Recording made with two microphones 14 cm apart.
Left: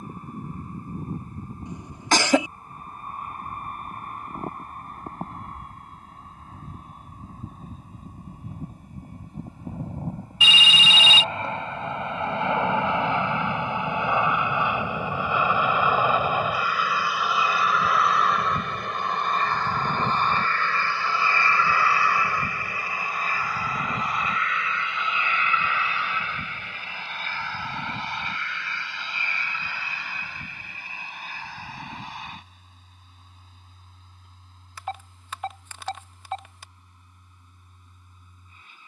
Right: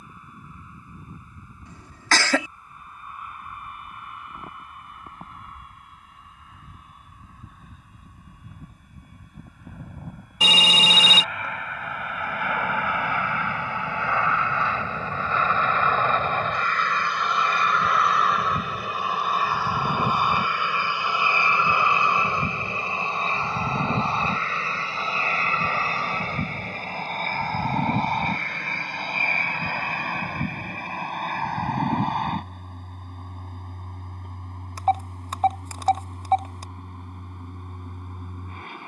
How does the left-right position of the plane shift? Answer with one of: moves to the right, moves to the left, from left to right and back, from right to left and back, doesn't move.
moves to the right.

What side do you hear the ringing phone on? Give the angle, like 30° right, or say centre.
40° right.